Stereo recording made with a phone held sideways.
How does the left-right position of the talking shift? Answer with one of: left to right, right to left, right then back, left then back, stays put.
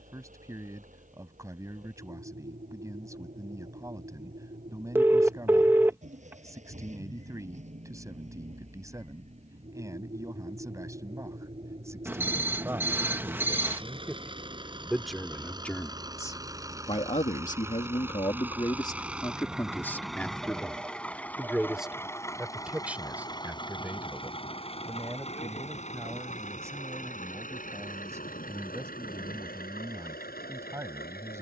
left then back.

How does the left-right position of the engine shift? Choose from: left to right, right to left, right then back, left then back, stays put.
right to left.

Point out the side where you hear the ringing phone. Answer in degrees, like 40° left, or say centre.
10° right.